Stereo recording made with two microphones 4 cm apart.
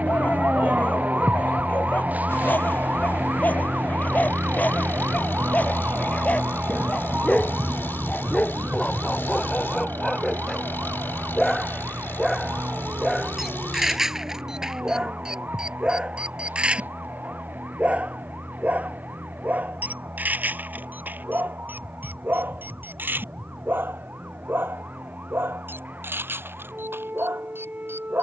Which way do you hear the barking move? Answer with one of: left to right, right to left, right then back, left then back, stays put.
left to right.